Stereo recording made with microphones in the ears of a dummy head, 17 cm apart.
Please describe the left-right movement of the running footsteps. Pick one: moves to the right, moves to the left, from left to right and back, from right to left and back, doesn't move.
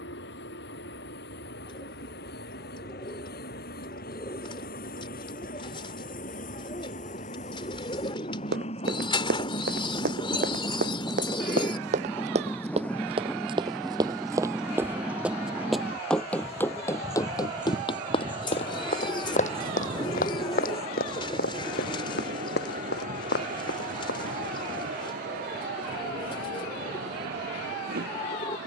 moves to the left.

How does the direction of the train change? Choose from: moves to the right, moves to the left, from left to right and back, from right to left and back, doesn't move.
moves to the right.